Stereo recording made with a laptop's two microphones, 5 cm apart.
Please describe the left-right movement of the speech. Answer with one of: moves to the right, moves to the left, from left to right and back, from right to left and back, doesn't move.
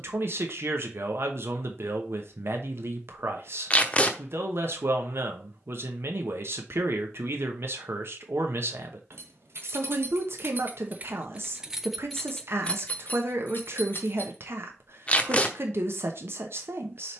doesn't move.